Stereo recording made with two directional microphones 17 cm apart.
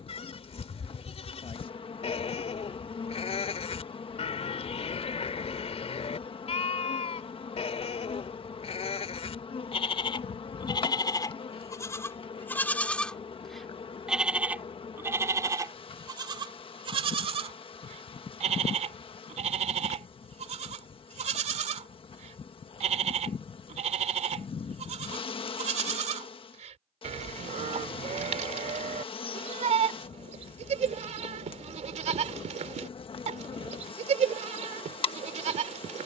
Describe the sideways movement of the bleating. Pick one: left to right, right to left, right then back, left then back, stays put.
left to right.